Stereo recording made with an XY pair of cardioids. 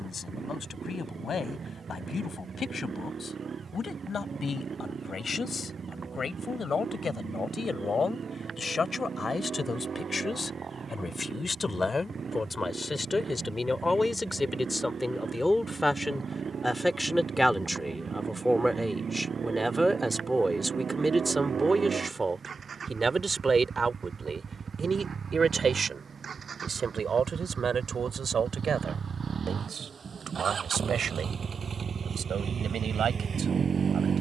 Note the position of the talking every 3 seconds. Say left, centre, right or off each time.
left, left, left, left, left, centre, centre, right, right, right, right, right.